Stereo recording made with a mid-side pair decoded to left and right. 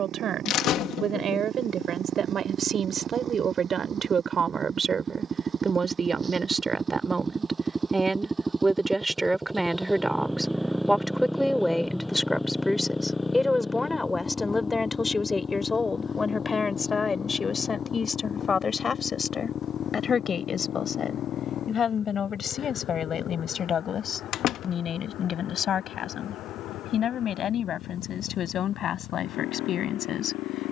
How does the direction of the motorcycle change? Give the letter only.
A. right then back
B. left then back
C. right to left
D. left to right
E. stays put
C.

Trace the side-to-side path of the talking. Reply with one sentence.
You can hear the talking travel towards the left.